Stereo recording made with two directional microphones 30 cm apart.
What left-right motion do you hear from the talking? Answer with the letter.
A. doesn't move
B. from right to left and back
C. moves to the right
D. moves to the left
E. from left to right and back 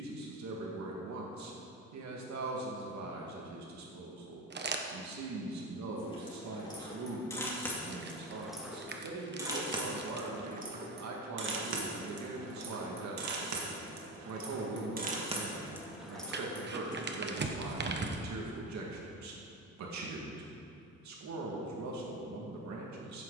A.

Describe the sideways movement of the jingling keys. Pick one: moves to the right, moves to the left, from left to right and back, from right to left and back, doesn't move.
from left to right and back.